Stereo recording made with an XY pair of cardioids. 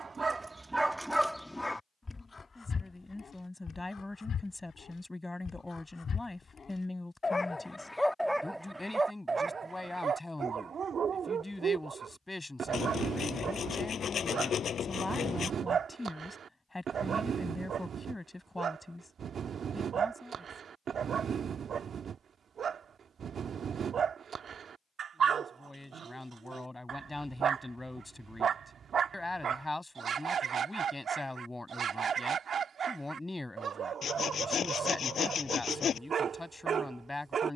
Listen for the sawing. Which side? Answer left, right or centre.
left.